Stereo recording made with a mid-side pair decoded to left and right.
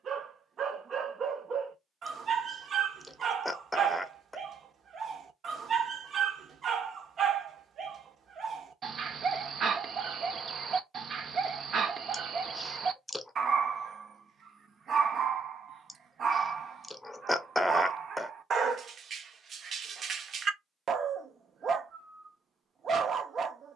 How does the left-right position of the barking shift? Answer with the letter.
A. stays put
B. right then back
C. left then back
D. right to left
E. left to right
A.